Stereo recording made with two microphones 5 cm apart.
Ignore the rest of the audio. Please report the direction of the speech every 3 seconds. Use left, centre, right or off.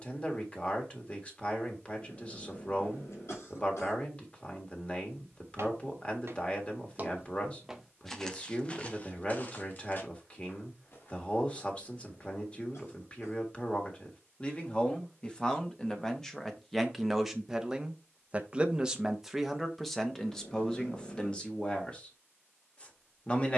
left, left, left, left, left, centre, centre, left.